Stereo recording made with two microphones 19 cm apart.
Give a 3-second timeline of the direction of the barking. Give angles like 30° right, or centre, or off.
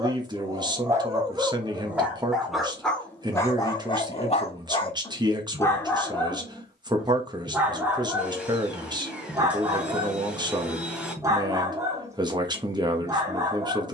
10° right, 20° left, centre, 20° right, 20° right.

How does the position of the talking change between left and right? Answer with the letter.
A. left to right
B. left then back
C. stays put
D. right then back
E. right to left
C.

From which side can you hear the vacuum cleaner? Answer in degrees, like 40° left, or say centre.
10° right.